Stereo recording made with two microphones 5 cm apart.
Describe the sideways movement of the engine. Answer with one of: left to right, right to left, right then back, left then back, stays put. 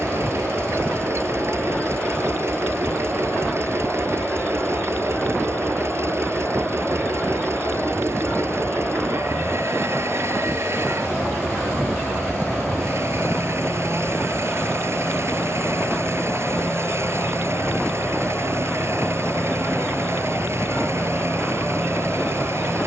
stays put.